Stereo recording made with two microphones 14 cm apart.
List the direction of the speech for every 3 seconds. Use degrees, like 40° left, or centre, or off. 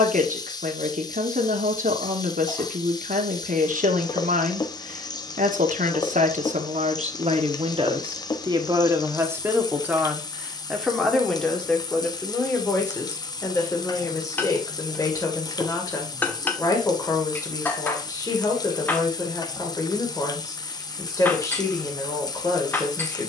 70° right, 70° right, 50° right, centre, 20° left, 20° left, 20° left, 20° left.